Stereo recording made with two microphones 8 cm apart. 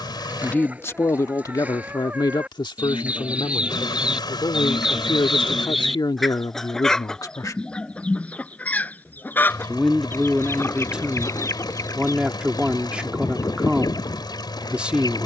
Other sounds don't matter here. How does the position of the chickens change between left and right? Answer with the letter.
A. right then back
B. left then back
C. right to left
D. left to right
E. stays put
C.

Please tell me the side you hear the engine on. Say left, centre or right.
left.